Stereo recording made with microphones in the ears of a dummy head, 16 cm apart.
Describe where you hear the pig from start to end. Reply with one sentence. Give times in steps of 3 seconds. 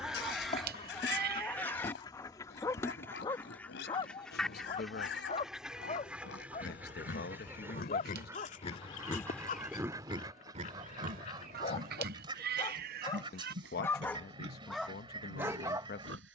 In this clip you hear the pig on the left from 0 s and on the right from 9 s.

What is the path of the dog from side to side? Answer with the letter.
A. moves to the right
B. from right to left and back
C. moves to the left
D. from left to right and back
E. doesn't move
B.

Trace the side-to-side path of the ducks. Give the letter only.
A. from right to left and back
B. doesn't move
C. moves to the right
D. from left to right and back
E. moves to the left
C.